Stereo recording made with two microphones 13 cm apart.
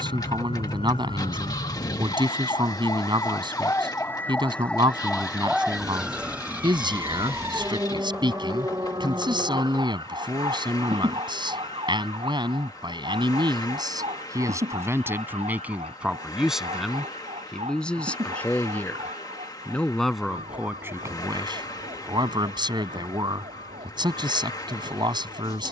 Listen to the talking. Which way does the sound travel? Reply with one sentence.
In this clip you hear the talking move from right to left and back again.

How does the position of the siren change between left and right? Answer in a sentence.
You can hear the siren travel towards the right.